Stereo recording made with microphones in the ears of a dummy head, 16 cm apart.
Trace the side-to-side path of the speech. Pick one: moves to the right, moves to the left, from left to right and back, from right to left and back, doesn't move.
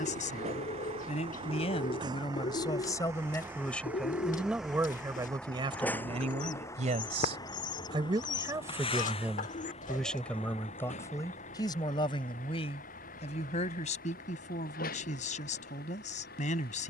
from left to right and back.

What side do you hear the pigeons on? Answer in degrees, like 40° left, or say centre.
50° left.